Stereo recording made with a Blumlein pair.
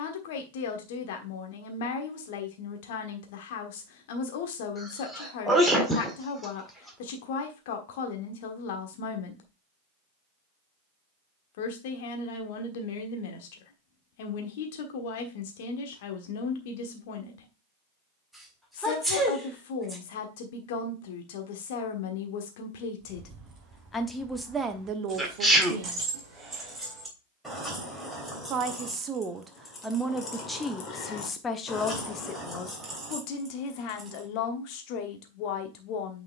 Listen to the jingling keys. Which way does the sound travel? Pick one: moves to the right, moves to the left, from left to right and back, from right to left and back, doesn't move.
from right to left and back.